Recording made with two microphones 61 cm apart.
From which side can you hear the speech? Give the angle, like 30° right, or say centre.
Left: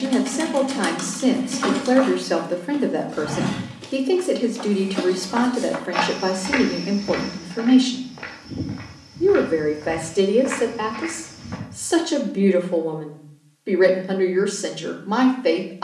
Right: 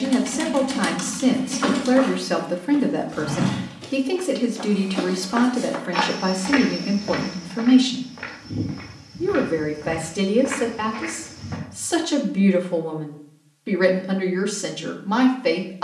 30° right.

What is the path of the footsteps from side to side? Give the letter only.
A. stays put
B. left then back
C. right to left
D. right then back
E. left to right
B.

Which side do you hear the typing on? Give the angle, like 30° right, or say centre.
20° right.